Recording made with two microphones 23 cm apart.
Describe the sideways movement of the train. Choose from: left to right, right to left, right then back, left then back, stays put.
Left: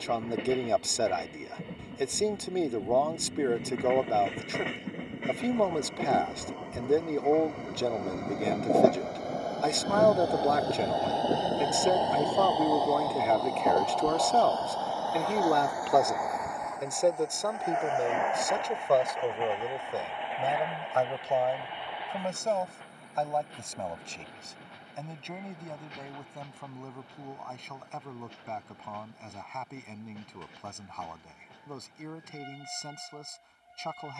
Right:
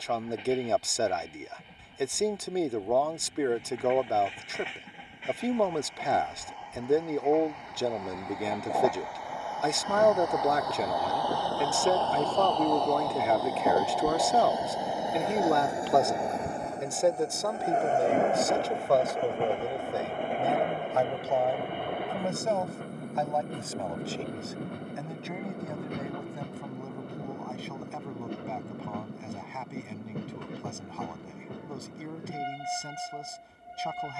left to right.